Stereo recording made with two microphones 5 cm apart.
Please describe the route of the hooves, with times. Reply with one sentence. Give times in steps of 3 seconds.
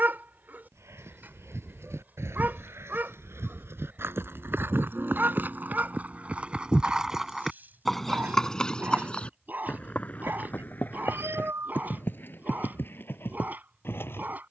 You can hear the hooves on the right from 0 s, in the centre from 6 s and on the left from 9 s.